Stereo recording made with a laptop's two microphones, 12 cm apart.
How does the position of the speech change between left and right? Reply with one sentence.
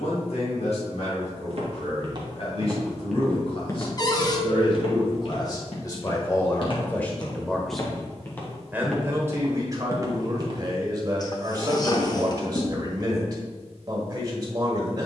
In this clip you hear the speech go from the left side to the right.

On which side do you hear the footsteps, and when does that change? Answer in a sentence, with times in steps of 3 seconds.
You can hear the footsteps on the right from 0 s, on the left from 3 s, on the right from 9 s and not at all from 12 s.